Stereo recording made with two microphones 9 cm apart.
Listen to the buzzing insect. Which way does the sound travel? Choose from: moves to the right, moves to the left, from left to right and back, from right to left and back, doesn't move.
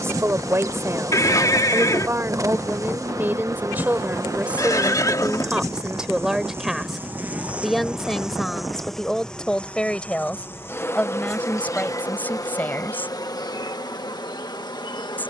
moves to the left.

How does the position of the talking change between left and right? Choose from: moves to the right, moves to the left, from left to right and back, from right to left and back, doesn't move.
moves to the left.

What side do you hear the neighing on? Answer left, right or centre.
left.